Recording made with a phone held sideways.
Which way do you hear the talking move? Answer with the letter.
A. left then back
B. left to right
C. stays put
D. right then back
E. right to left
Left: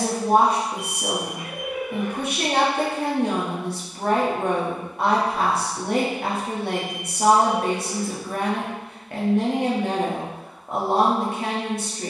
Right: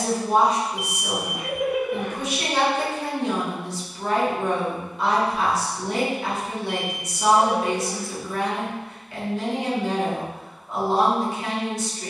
C.